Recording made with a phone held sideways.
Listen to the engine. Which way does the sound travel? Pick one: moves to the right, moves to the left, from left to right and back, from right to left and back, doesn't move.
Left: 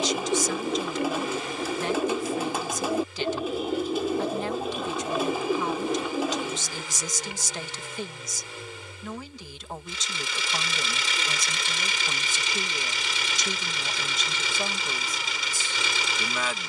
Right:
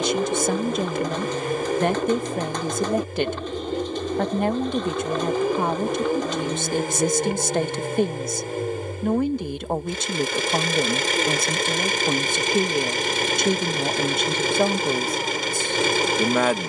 doesn't move.